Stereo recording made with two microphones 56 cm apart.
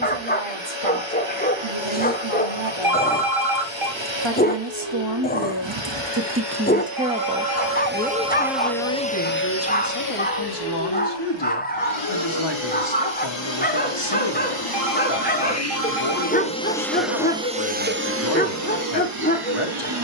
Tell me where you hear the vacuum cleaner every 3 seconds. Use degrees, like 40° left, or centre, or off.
60° right, 60° right, 30° right, 40° left, 50° left, 10° left, 40° right.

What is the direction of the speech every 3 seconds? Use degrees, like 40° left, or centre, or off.
60° right, 50° right, centre, 40° left, 50° left, 50° left, 50° left.